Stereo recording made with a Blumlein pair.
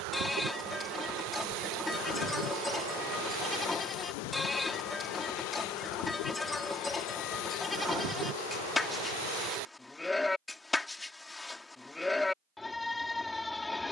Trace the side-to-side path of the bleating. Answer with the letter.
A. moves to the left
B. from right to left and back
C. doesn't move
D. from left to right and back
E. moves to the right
C.